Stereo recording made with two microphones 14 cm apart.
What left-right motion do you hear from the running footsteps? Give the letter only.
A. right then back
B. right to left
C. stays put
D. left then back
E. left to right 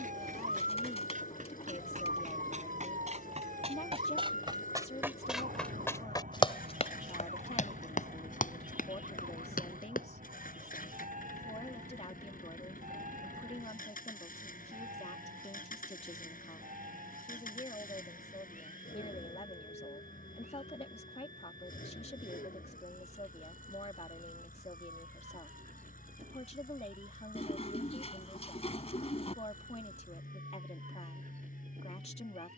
B.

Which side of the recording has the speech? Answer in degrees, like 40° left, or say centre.
50° left.